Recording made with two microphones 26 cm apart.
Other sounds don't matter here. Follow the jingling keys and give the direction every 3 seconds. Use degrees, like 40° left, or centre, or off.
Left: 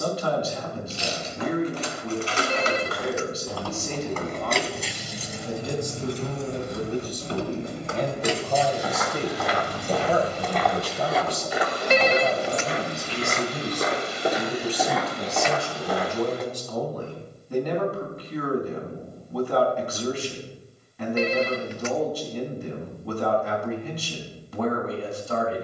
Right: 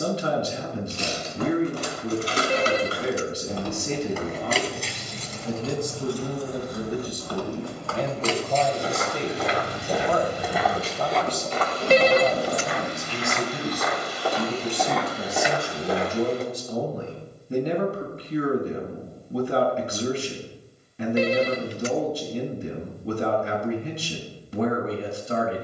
50° right, centre, 20° left, 20° right, 50° right, off, off, off, off.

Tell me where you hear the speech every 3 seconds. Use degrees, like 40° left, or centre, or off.
30° right, 30° right, 10° right, 10° left, 10° right, 20° right, 30° right, 30° right, 30° right.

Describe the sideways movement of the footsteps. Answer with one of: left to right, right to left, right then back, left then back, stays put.
left then back.